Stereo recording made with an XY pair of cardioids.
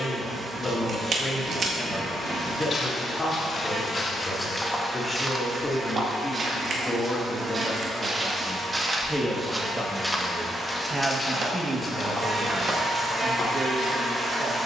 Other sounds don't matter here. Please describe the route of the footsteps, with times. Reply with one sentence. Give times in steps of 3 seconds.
You can hear the footsteps on the left from 0 s, in the centre from 3 s, on the right from 6 s, in the centre from 9 s and on the left from 12 s.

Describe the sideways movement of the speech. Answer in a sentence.
You can hear the speech move from left to right.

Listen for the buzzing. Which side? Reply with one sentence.
You can hear the buzzing on the right.